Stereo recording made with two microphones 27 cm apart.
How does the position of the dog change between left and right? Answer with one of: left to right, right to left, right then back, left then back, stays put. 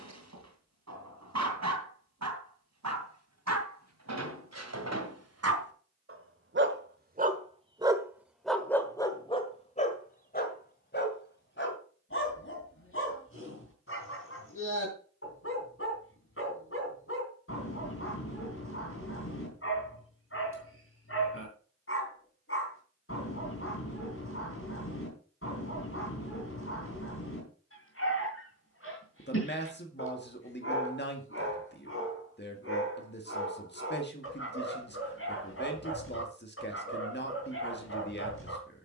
right to left.